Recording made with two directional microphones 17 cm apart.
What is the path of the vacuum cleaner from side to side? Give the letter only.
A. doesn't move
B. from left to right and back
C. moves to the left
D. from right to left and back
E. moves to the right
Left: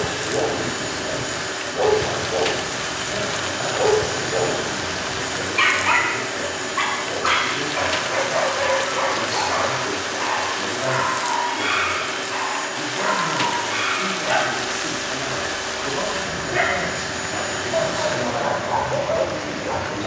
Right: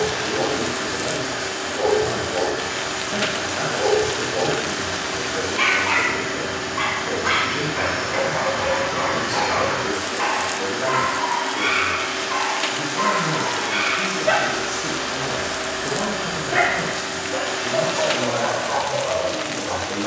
A.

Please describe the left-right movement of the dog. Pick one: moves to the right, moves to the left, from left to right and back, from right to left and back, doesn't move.
from left to right and back.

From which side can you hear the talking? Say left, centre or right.
right.